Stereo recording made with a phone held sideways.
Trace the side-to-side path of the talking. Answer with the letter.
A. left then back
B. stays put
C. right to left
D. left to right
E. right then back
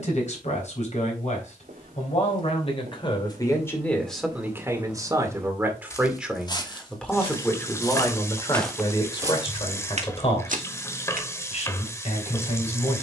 E.